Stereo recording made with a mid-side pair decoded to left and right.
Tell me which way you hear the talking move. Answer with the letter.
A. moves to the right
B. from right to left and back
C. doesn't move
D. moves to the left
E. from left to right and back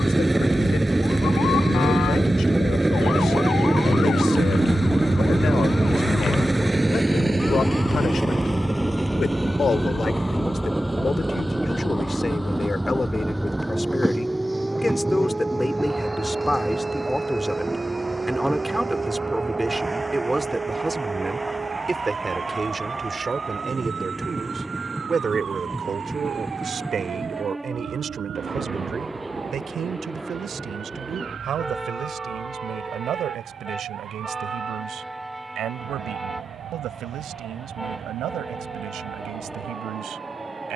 A.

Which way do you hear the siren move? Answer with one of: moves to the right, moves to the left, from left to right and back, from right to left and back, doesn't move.
moves to the right.